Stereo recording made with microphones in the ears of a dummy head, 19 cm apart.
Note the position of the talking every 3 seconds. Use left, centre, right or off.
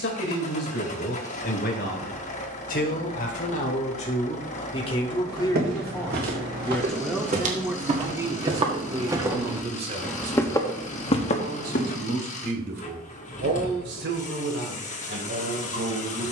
left, left, centre, right, right, right.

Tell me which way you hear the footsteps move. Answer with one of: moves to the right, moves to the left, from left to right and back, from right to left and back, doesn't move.
moves to the left.